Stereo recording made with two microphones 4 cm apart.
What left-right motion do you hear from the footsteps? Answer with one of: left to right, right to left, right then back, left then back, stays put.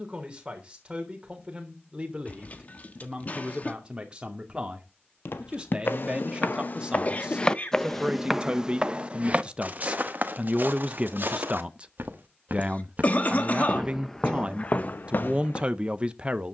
right then back.